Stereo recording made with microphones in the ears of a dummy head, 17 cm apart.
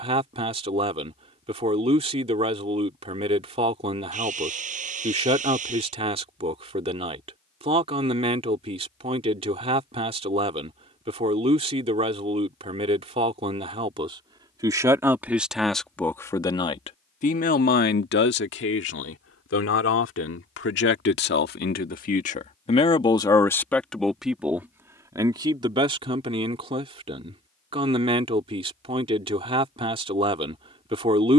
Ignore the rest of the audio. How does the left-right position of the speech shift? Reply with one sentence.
In this clip you hear the speech go left and come back.